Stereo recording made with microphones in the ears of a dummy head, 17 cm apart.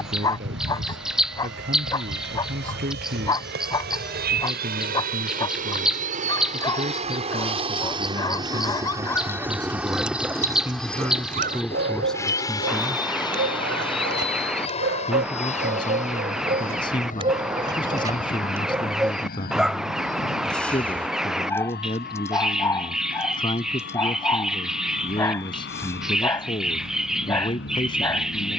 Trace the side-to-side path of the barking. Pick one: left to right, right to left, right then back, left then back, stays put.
right then back.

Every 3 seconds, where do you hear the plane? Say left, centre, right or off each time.
right, right, right, centre, left, left, left, left, left, left.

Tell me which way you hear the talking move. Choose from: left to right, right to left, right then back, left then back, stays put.
right to left.